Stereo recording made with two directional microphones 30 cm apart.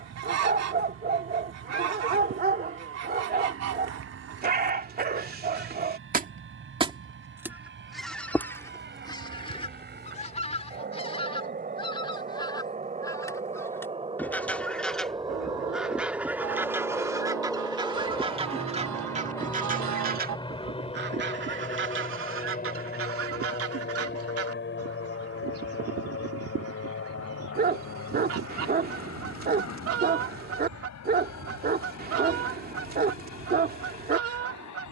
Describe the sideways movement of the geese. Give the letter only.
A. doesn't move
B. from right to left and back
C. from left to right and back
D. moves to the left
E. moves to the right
B.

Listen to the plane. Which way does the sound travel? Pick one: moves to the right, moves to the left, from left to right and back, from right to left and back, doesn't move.
moves to the left.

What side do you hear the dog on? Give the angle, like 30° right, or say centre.
30° right.